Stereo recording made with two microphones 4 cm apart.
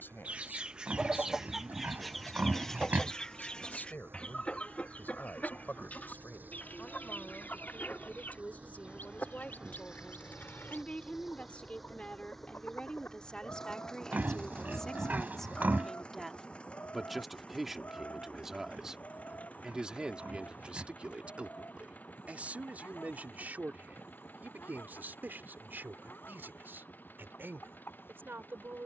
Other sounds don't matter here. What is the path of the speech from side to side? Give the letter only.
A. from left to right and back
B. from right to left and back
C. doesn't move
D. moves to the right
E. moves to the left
D.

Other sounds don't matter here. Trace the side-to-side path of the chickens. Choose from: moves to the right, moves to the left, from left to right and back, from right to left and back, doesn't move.
moves to the left.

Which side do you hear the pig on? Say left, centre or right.
right.